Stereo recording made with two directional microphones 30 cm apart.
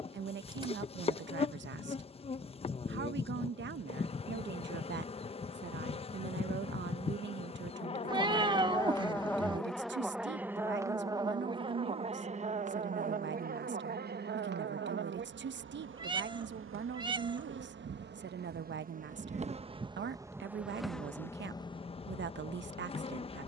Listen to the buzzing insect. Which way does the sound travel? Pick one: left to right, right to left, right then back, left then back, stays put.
right then back.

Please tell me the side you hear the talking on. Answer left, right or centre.
right.